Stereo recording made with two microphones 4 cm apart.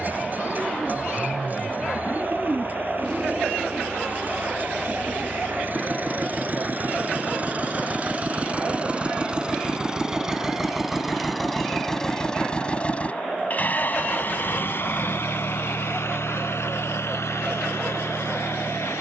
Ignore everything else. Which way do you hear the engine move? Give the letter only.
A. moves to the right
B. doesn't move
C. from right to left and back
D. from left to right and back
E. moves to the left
E.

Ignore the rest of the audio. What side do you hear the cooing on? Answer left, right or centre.
right.